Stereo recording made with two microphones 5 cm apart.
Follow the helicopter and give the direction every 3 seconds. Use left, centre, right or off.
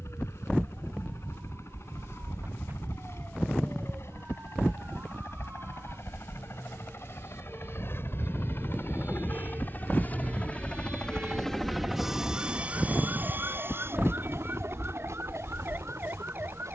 left, left, left, left, right, right.